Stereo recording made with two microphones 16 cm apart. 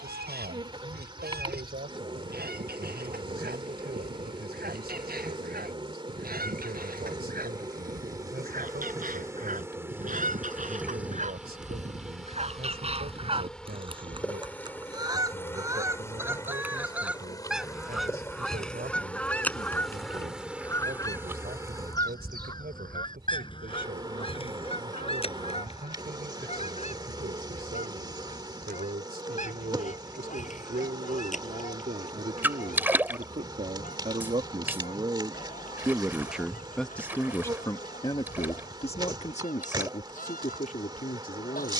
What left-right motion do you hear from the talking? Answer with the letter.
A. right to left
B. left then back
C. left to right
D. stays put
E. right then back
A.